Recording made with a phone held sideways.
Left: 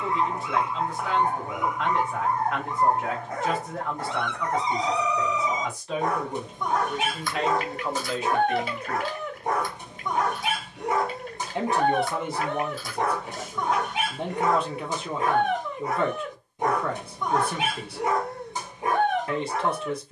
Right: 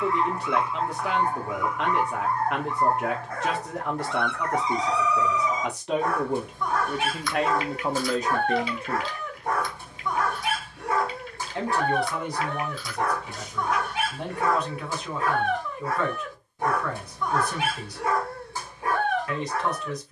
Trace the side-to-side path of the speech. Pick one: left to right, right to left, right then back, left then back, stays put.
right to left.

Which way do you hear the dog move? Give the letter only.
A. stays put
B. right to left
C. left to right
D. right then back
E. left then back
A.